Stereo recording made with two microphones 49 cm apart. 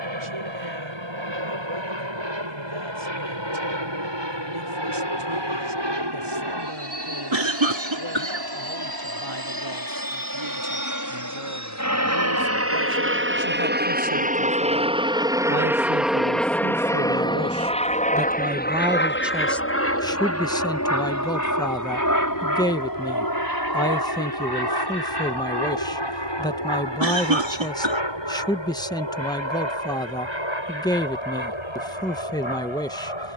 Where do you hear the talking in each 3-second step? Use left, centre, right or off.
right, right, right, right, right, right, centre, centre, centre, centre, centre.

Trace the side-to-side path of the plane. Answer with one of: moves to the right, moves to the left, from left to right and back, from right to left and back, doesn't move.
moves to the left.